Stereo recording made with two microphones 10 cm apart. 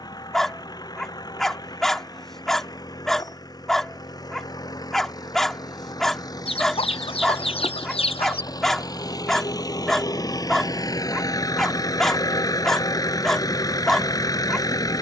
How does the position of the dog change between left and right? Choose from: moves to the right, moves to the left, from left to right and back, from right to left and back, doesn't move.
doesn't move.